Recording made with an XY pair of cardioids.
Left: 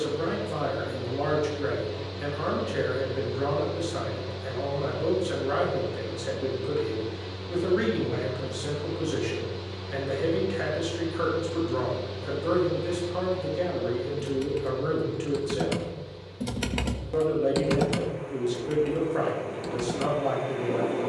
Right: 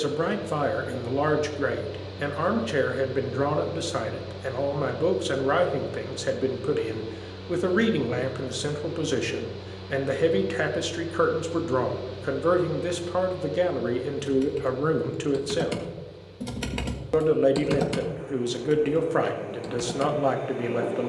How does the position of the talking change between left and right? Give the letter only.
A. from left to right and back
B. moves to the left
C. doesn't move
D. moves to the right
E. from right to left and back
C.